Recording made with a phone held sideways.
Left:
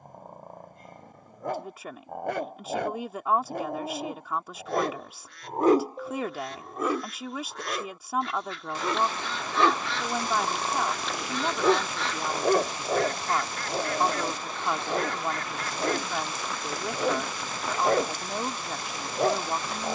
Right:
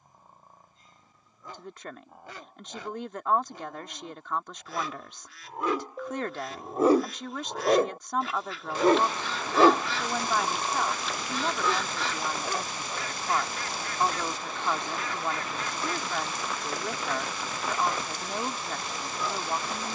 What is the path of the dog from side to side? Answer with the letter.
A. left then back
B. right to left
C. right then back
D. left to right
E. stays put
C.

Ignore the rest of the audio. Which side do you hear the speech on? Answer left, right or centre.
centre.